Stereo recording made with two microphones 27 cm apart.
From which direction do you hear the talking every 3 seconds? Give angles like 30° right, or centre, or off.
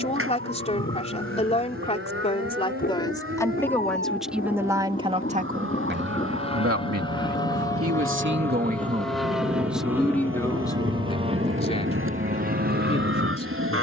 20° left, 10° right, 50° right, 10° left, 20° left.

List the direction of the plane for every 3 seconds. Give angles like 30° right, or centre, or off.
50° left, 30° left, 20° left, 10° right, 40° right.